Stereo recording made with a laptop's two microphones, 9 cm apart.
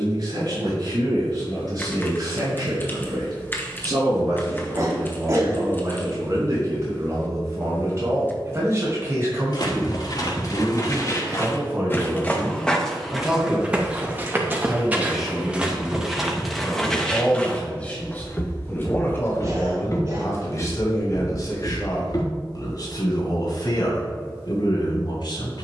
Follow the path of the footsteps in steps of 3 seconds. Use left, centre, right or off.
off, off, off, left, centre, centre, left, left, off.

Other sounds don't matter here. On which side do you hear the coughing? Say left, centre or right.
right.